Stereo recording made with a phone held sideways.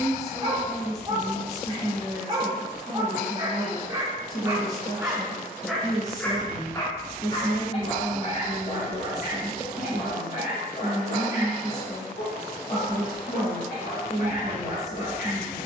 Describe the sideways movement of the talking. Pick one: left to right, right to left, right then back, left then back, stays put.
stays put.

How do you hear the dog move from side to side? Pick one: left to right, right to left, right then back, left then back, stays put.
right to left.